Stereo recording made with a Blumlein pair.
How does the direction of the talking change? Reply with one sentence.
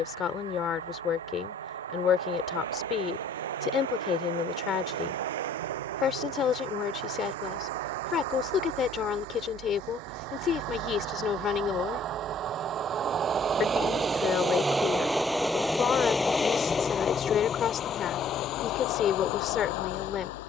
You can hear the talking stay put.